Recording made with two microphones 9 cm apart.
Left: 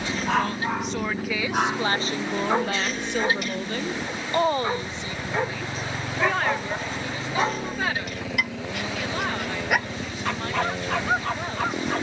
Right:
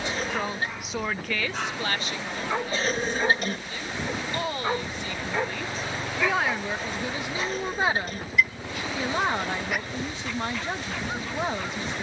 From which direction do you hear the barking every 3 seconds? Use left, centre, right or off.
left, centre, left, left.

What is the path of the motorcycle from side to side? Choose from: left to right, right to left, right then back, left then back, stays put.
stays put.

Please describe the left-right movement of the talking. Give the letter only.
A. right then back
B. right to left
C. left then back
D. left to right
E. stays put
C.